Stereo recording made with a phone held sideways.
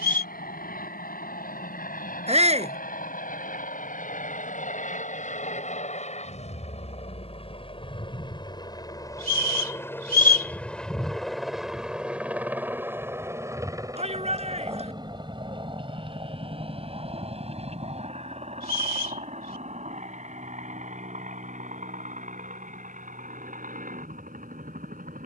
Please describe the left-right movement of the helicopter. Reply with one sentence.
In this clip you hear the helicopter travel towards the right.